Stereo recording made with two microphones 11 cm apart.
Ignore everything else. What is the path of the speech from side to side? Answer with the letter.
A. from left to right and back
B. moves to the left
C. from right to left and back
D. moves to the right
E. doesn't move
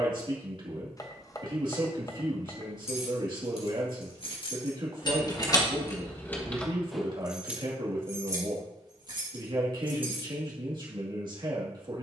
E.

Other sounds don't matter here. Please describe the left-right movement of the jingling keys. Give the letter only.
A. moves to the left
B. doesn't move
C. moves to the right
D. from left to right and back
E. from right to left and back
C.